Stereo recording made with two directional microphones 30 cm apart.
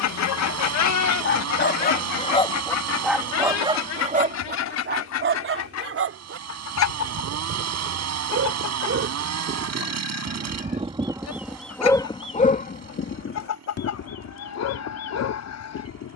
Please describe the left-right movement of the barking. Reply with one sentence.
You can hear the barking go right and come back.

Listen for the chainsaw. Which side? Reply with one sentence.
You can hear the chainsaw on the right.